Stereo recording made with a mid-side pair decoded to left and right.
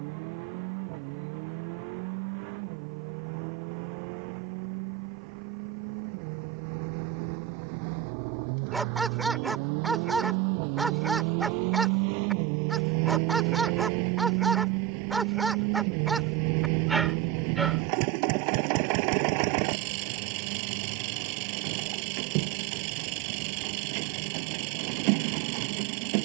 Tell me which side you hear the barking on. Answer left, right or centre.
centre.